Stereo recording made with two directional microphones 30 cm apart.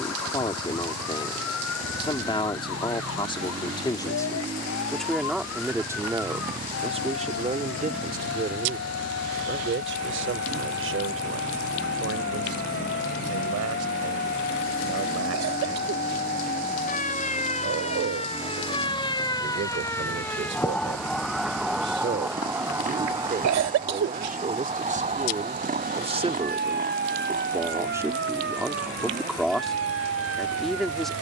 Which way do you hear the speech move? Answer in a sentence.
You can hear the speech move from left to right and back again.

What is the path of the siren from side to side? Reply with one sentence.
You can hear the siren travel towards the right.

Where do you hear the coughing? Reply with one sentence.
You can hear the coughing on the right.